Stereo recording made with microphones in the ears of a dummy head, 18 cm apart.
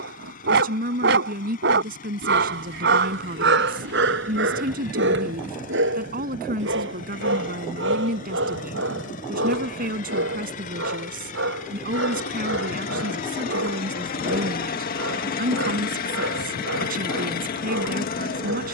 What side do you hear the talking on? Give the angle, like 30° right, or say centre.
50° right.